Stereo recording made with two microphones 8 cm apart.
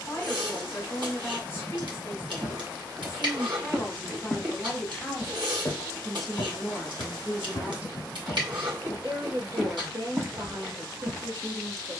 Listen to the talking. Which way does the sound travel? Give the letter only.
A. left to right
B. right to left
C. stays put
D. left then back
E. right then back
A.